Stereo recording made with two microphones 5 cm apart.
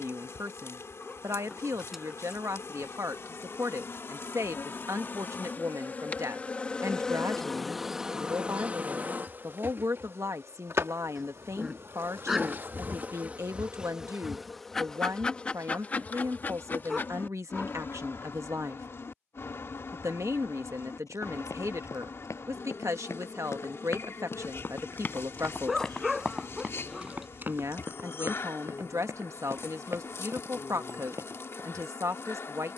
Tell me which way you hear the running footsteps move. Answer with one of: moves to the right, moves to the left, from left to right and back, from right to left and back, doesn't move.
moves to the right.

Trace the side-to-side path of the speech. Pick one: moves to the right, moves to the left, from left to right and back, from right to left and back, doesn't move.
doesn't move.